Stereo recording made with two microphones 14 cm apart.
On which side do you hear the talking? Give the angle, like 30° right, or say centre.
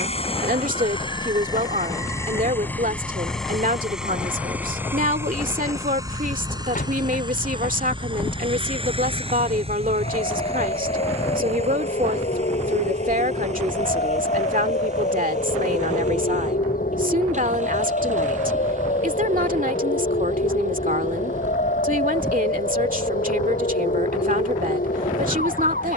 70° right.